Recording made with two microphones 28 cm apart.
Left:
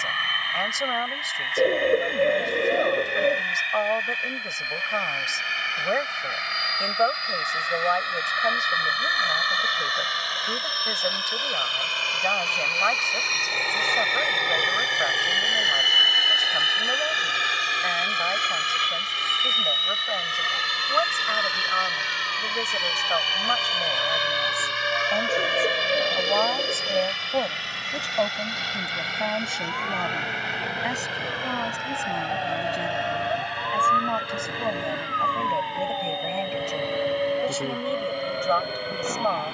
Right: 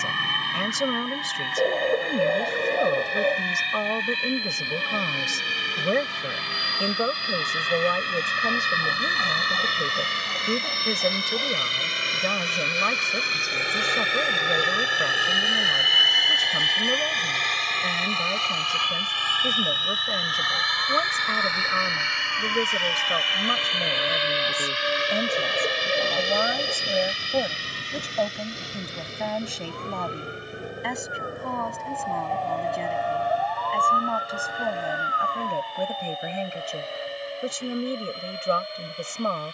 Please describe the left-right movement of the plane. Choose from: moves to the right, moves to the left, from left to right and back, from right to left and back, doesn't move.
moves to the left.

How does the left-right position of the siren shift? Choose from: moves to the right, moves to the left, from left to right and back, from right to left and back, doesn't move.
moves to the left.